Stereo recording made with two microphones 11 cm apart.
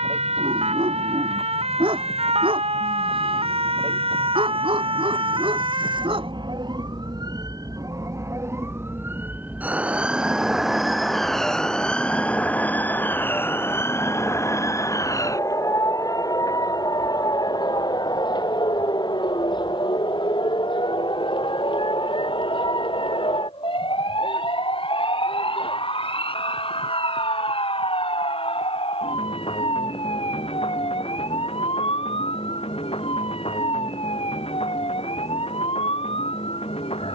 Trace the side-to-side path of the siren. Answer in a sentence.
In this clip you hear the siren move to the left.